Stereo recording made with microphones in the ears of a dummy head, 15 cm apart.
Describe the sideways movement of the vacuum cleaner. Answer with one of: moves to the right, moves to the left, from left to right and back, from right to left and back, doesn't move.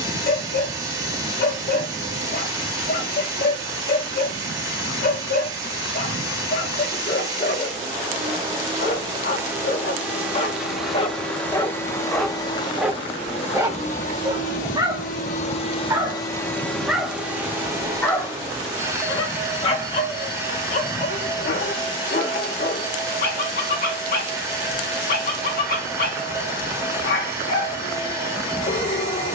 from right to left and back.